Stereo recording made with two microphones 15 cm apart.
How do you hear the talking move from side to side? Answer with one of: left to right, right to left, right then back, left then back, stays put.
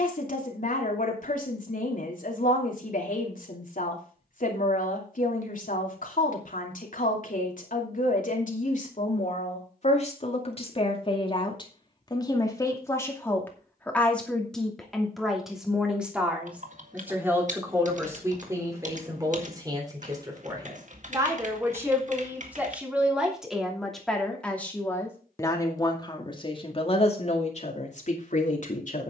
right then back.